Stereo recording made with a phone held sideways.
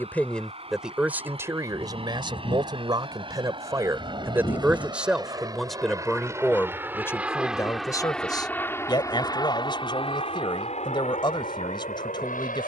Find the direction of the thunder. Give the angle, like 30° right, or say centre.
40° left.